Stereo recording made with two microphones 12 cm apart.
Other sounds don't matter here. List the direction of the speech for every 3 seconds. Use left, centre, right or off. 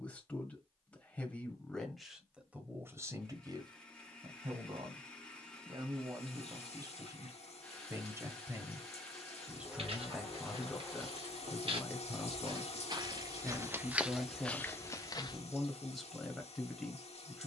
centre, right, right, centre, centre, centre.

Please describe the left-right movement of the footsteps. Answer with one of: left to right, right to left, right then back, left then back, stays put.
right to left.